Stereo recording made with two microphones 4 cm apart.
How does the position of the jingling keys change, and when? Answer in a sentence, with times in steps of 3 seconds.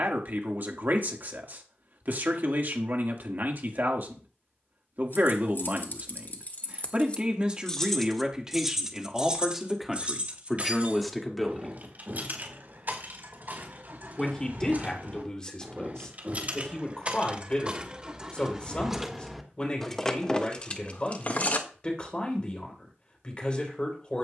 You can hear the jingling keys not at all from 0 s, on the left from 3 s, on the right from 9 s, in the centre from 18 s and on the left from 21 s.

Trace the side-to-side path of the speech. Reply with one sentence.
In this clip you hear the speech move to the left.